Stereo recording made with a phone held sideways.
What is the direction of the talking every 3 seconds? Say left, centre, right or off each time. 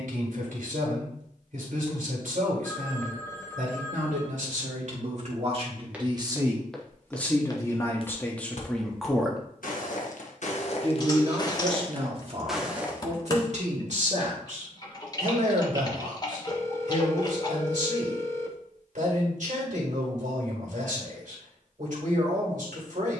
right, right, centre, right, right, right, right, right.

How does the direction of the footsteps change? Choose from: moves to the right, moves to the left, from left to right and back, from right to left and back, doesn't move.
from right to left and back.